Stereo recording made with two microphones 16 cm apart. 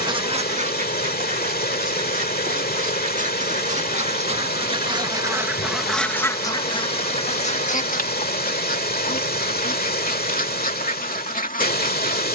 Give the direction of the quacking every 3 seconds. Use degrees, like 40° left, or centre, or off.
60° right, 30° right, 40° left, 60° left.